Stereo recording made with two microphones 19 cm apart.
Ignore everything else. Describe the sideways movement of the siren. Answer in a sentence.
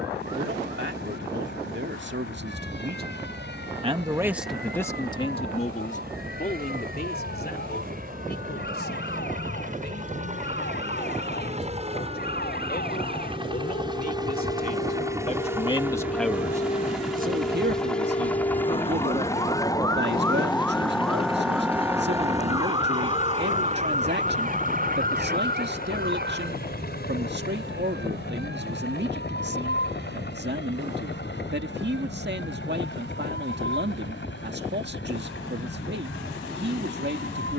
You can hear the siren move to the right.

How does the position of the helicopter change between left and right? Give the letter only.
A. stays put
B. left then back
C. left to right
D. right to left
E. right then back
D.